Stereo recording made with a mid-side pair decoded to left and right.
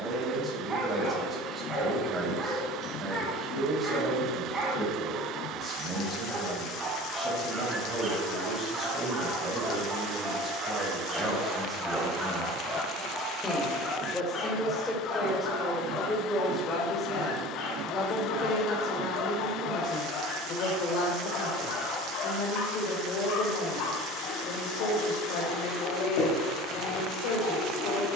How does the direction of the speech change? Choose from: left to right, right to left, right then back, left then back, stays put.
right to left.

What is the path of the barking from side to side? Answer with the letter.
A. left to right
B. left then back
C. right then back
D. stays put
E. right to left
E.